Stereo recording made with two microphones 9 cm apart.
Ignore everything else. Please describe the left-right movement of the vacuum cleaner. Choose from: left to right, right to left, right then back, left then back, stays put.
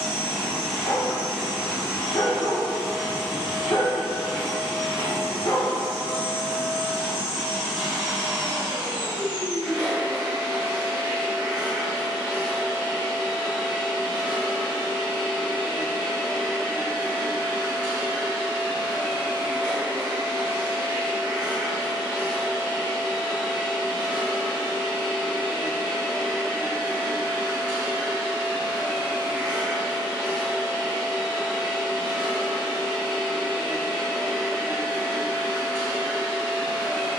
stays put.